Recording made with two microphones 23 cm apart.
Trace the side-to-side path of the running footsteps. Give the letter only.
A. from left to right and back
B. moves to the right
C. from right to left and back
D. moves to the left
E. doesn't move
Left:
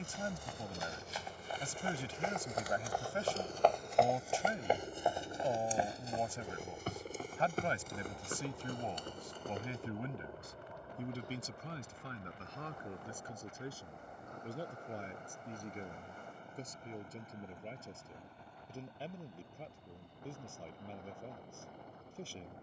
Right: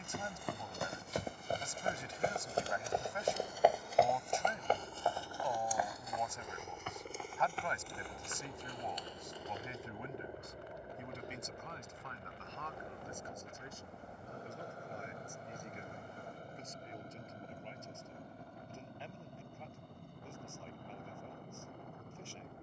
D.